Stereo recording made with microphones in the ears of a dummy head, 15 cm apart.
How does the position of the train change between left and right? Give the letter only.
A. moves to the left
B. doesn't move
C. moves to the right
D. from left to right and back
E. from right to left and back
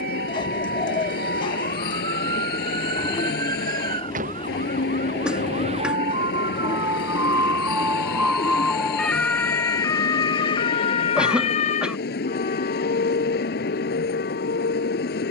B.